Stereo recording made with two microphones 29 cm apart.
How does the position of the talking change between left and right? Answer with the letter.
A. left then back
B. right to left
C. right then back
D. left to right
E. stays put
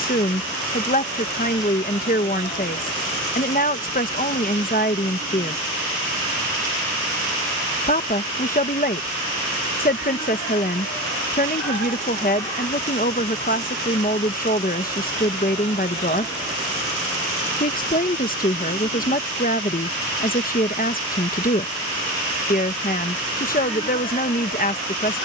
E.